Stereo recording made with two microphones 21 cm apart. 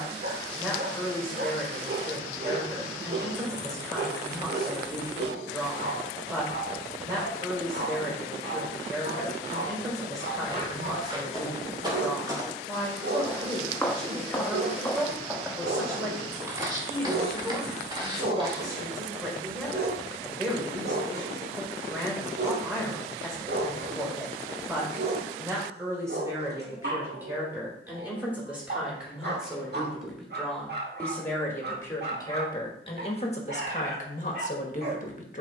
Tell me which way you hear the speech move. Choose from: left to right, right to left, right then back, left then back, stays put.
right to left.